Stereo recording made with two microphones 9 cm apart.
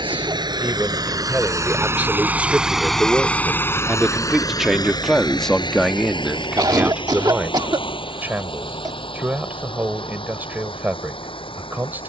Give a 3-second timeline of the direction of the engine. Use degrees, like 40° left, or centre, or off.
40° right, 40° left, 70° left, 80° left.